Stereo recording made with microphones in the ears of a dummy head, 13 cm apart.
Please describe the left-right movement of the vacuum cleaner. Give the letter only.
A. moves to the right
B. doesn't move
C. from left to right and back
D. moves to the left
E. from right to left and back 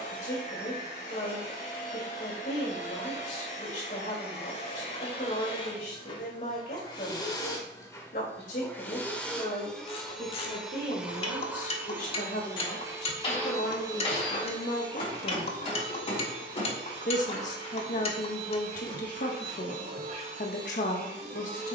A.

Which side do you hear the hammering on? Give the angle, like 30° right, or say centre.
40° left.